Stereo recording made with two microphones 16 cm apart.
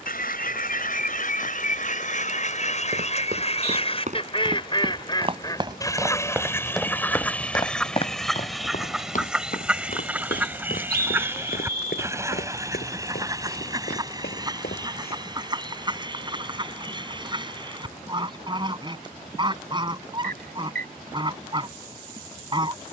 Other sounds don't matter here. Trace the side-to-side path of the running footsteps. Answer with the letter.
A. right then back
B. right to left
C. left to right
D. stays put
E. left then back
B.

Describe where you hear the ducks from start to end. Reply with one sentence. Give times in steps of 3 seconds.
In this clip you hear the ducks on the left from 0 s, in the centre from 6 s and on the right from 12 s.